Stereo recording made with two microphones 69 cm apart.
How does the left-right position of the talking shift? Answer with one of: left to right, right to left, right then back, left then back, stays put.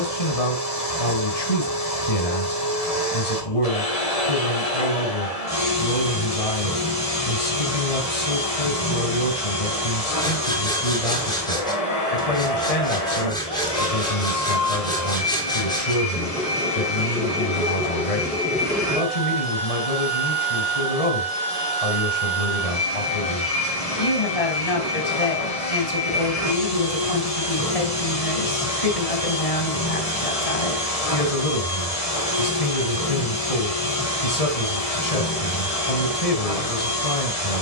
stays put.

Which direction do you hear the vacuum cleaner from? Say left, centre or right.
left.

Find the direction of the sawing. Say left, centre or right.
centre.